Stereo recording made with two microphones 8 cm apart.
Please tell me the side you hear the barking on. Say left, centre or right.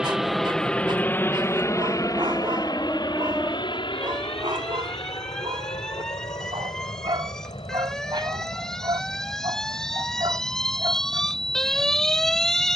right.